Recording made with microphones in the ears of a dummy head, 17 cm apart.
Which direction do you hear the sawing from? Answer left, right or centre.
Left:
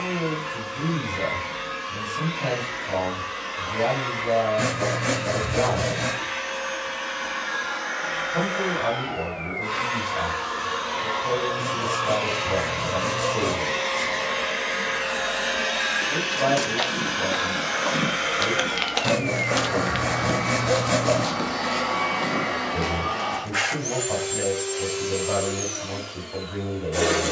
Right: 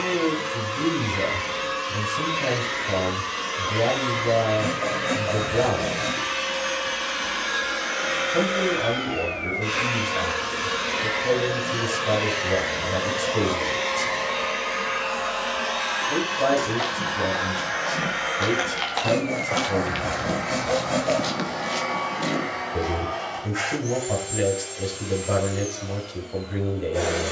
left.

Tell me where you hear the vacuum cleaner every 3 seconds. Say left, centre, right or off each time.
right, right, right, right, centre, left, left, left, left.